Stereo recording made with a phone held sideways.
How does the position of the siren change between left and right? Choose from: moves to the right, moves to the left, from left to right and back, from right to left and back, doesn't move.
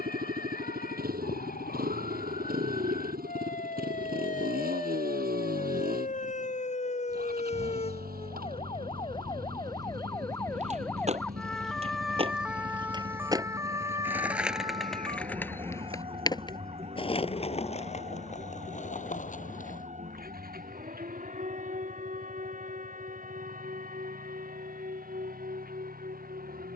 moves to the right.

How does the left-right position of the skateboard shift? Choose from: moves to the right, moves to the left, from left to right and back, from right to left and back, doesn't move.
moves to the left.